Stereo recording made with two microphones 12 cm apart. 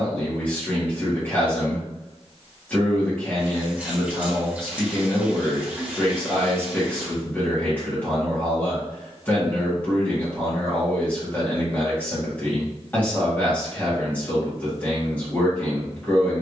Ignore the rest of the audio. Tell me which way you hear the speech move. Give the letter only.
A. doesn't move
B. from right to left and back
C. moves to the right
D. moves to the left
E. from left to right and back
A.